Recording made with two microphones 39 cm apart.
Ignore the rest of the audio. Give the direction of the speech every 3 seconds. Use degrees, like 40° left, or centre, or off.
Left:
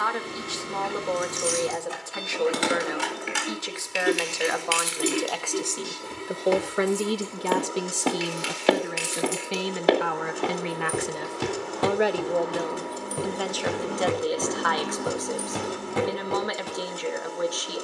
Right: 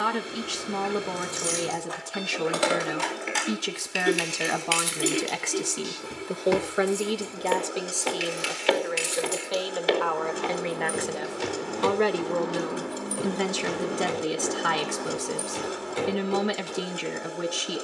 50° right, 40° right, 20° left, 30° left, 30° right, 40° right.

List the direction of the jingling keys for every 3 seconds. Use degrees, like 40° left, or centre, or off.
40° left, 10° left, 30° right, 50° right, 10° right, 40° left.